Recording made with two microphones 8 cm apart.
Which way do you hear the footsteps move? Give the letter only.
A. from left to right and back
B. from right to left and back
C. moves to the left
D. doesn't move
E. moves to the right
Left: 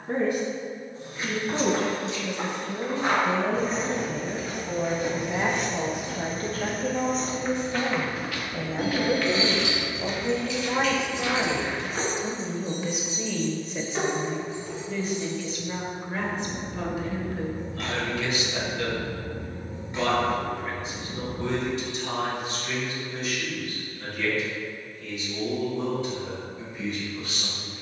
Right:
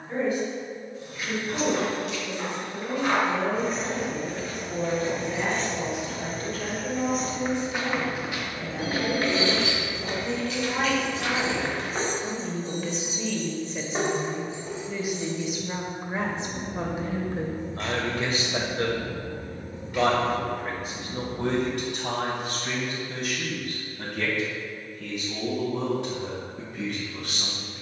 E.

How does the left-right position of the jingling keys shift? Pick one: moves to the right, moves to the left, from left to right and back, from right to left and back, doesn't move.
moves to the left.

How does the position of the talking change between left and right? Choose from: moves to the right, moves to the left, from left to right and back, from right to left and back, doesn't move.
moves to the right.